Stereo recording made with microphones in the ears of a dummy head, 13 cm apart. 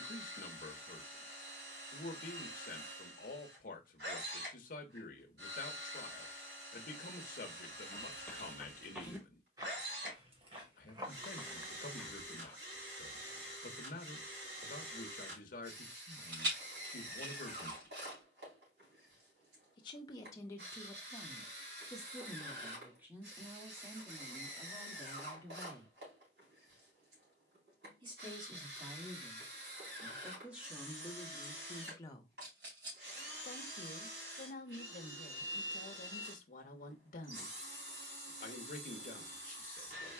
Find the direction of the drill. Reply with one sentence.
In this clip you hear the drill on the right.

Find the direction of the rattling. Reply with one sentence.
In this clip you hear the rattling on the right.